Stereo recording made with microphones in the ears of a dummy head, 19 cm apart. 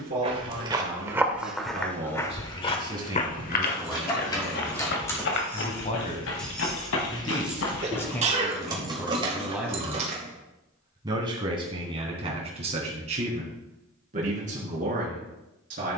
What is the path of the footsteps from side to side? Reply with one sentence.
In this clip you hear the footsteps move to the left.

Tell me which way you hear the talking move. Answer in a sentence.
In this clip you hear the talking move from right to left and back again.